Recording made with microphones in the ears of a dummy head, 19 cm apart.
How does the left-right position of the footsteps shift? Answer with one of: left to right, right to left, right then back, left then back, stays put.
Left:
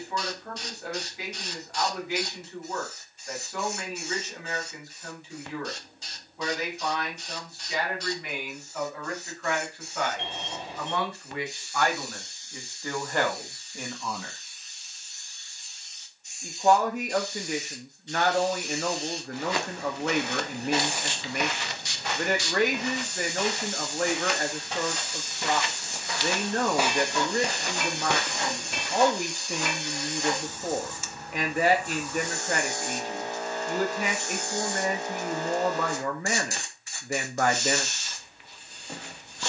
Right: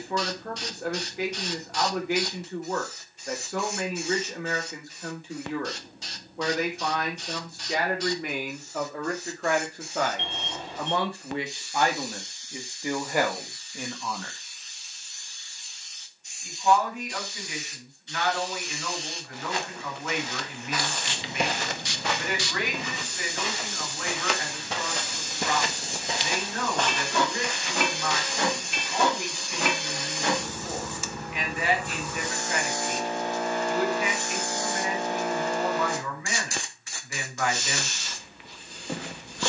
right then back.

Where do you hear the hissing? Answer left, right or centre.
right.